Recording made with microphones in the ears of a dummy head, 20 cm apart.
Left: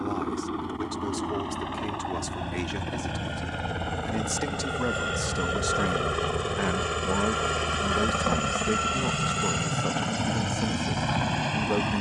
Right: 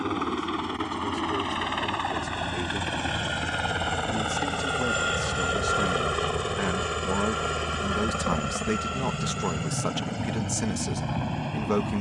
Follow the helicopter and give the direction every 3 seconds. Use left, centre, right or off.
right, right, centre, left.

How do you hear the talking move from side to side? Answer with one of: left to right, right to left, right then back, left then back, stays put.
left to right.